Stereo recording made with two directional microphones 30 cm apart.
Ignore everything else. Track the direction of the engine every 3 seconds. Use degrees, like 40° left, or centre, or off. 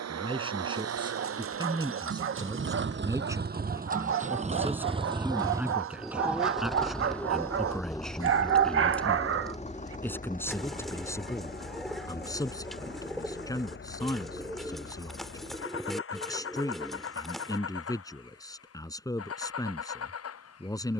50° right, 20° right, 10° left, 30° left, 40° left, 50° left, 50° left.